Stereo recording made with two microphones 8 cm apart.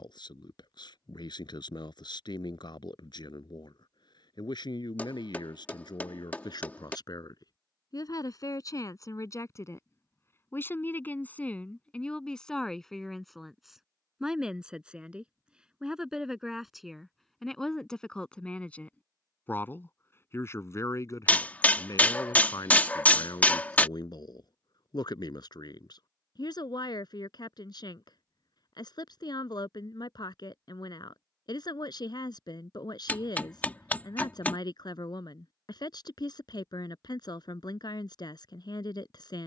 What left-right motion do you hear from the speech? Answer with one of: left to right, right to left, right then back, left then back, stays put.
right then back.